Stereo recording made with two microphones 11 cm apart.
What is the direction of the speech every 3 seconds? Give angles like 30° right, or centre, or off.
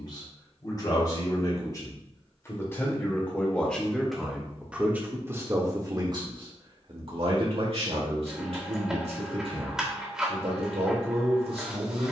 30° left, 10° right, 60° right, 60° right.